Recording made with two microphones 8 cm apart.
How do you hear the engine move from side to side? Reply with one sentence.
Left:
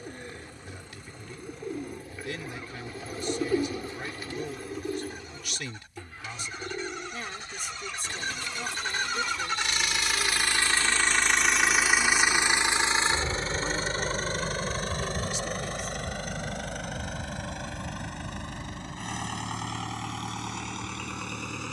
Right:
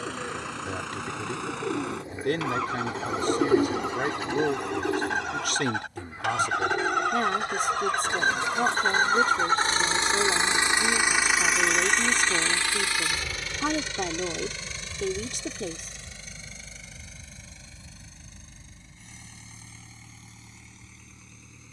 In this clip you hear the engine move to the left.